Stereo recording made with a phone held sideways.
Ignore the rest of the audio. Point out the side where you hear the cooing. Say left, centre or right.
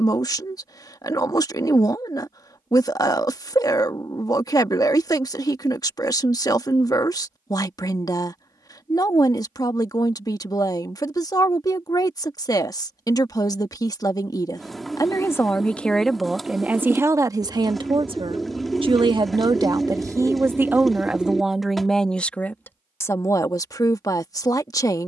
centre.